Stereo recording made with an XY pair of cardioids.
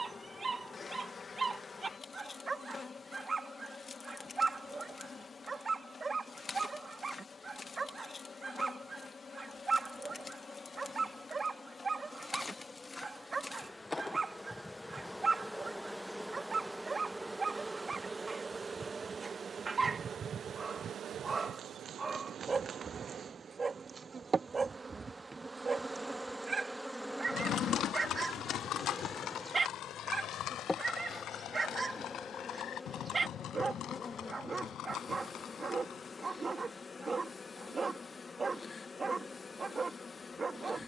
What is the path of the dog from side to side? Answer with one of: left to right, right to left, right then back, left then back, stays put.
stays put.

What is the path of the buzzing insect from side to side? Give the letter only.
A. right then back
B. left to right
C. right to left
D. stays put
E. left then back
A.